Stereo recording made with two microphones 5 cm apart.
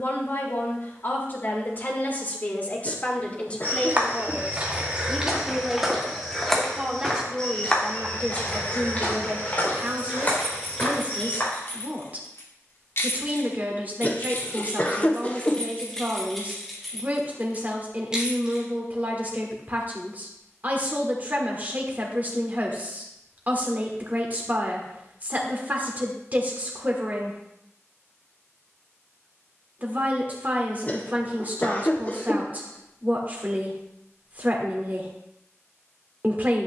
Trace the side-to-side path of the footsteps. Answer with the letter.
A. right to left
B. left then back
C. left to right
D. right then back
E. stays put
A.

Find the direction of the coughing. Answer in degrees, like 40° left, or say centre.
30° left.